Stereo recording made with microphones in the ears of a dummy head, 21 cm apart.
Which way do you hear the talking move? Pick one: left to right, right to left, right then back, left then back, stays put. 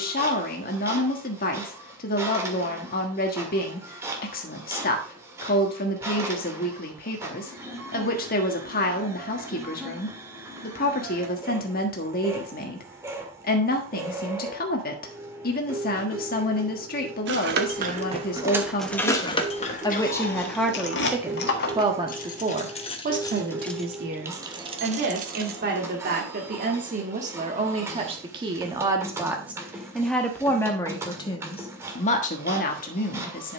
right then back.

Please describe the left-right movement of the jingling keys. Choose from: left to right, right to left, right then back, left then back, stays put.
left then back.